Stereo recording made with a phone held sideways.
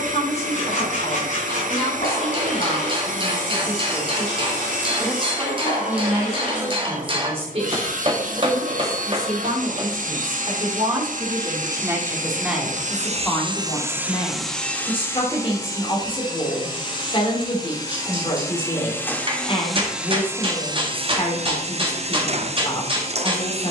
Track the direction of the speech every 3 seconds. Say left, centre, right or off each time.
left, left, right, right, centre, left, left, left.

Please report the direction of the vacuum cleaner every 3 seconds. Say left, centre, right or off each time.
right, right, right, right, right, left, centre, right.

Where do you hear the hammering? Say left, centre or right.
right.